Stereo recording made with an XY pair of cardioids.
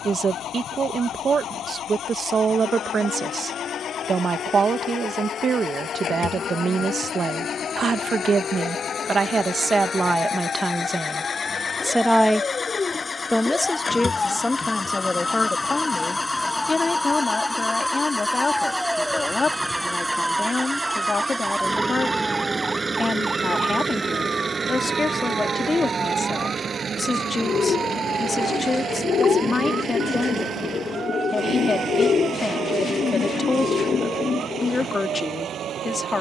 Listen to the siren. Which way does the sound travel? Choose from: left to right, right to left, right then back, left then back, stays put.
left to right.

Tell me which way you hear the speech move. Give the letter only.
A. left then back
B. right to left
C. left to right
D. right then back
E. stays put
B.